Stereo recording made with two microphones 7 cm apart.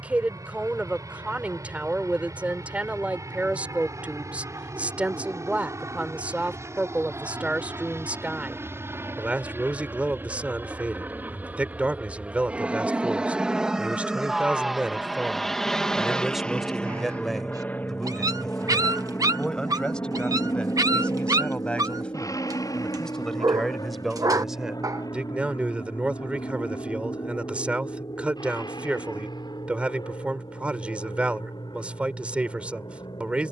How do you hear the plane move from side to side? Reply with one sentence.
In this clip you hear the plane travel towards the left.